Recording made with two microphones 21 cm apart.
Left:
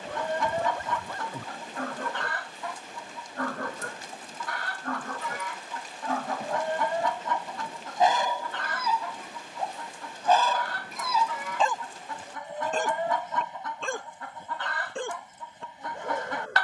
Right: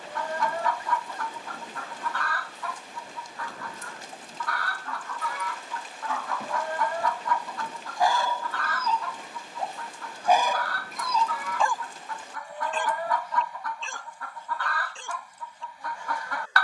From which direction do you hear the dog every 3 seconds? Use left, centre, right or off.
left, left, left, centre, left, left.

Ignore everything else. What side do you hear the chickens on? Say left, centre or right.
left.